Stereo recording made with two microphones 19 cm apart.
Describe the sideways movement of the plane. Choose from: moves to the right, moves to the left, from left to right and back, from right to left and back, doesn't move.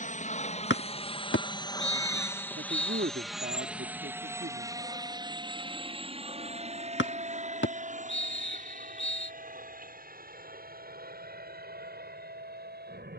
moves to the right.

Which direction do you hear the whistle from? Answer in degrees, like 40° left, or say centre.
80° left.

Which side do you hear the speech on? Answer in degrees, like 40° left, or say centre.
70° right.